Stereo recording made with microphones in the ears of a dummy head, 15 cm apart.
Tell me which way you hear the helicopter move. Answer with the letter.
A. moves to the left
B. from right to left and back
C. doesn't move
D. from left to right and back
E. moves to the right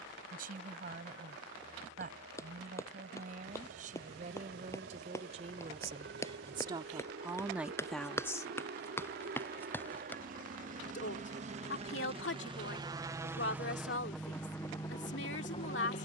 A.